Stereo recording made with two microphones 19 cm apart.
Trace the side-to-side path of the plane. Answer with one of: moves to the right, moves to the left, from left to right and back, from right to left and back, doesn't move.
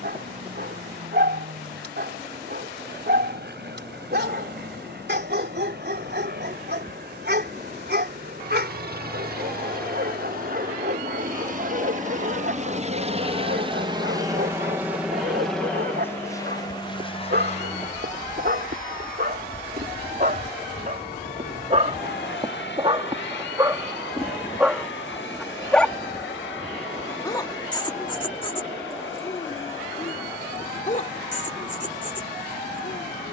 moves to the left.